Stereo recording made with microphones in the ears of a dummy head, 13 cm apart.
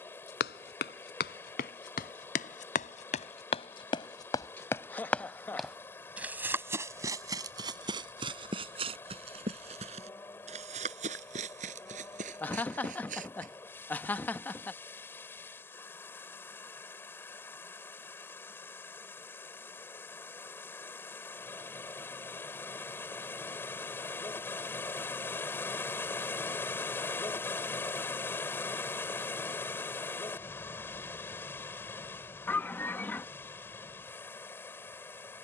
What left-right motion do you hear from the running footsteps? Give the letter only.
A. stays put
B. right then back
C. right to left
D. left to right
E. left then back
D.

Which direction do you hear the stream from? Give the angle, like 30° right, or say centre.
10° left.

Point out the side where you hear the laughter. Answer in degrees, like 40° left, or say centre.
10° left.